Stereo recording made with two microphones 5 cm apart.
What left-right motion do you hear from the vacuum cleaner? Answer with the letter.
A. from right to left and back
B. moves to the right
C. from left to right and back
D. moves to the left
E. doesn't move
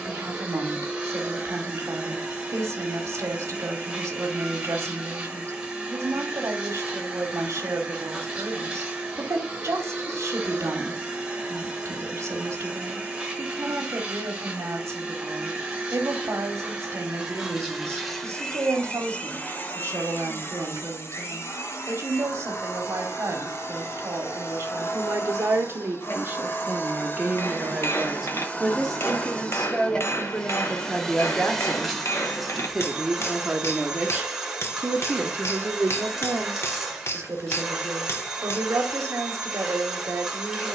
A.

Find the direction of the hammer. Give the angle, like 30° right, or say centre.
50° left.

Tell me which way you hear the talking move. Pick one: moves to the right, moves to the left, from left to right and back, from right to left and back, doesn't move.
from right to left and back.